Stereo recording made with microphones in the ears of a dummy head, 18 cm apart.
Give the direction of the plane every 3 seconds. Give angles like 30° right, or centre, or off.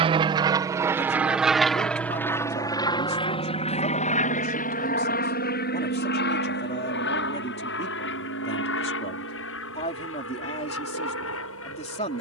centre, 40° left, 50° left, 60° left.